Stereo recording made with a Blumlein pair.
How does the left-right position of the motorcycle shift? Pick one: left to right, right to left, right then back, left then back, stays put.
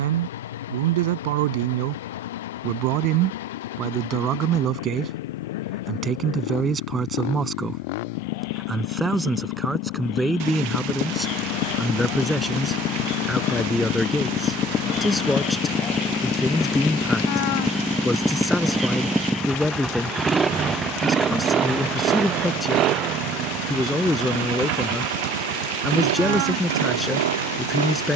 left to right.